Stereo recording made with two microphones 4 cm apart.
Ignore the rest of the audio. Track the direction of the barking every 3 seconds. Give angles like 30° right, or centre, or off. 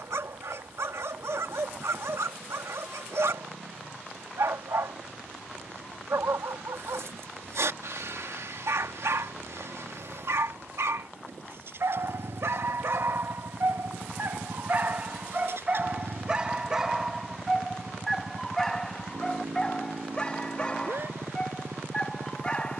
80° right, 80° right, 80° right, 80° right, 50° right, 20° right, 10° left, 20° left.